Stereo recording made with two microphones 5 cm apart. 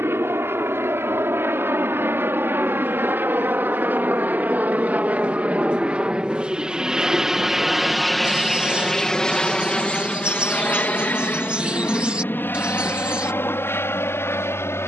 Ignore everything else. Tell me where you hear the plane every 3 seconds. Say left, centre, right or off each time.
right, right, centre, left, left.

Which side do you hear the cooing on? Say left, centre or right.
right.